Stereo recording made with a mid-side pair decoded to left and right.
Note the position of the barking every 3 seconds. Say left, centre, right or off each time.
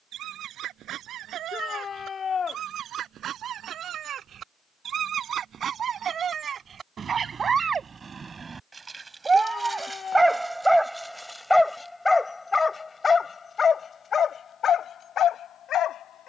right, right, right, centre, left, left.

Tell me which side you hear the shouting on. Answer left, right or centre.
left.